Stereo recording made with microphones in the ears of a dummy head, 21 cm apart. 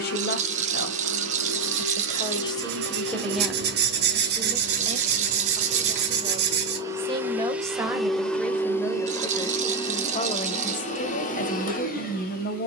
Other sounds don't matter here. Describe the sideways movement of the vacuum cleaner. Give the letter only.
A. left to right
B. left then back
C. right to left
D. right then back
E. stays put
C.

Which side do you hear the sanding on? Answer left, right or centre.
right.